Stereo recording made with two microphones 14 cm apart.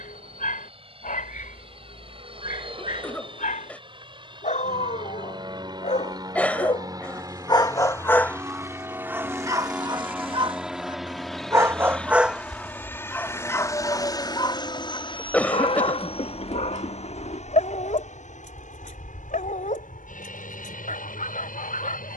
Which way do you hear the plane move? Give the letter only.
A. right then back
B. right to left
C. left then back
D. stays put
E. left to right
B.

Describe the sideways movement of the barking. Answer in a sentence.
In this clip you hear the barking move from left to right and back again.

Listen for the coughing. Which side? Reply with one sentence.
In this clip you hear the coughing in the centre.